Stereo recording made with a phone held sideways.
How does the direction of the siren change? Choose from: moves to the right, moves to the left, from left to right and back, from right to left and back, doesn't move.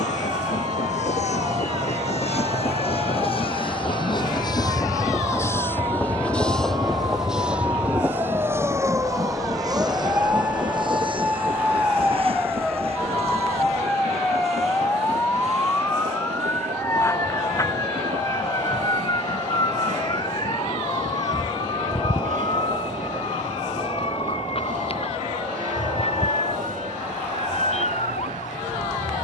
moves to the left.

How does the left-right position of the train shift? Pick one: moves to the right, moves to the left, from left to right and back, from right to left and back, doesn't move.
moves to the right.